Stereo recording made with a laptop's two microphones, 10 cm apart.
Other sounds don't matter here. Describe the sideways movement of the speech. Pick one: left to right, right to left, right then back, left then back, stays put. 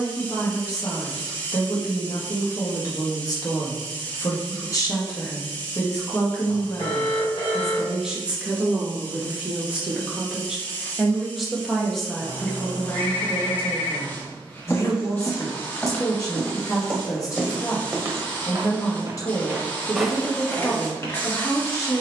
right then back.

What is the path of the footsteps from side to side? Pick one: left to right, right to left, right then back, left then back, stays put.
right then back.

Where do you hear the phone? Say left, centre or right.
left.